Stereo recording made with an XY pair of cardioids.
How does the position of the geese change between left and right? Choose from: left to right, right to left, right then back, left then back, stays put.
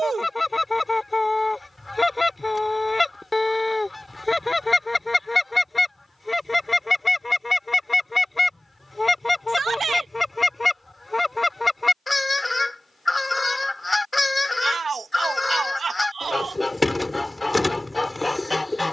stays put.